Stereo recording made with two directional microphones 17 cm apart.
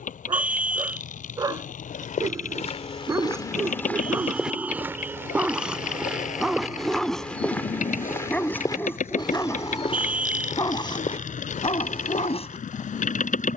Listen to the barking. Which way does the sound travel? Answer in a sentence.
In this clip you hear the barking travel towards the left.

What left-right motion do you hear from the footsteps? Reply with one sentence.
You can hear the footsteps move from left to right and back again.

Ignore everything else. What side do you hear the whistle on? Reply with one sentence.
You can hear the whistle in the centre.